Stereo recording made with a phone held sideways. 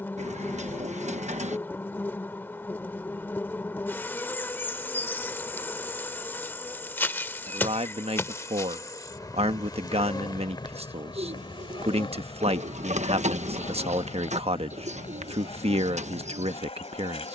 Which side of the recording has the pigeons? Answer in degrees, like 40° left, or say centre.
50° right.